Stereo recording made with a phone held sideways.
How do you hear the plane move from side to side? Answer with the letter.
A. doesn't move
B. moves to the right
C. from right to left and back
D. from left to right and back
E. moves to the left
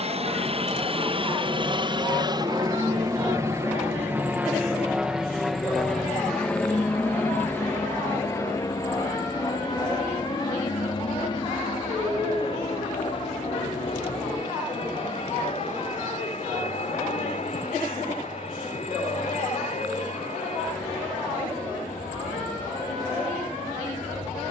E.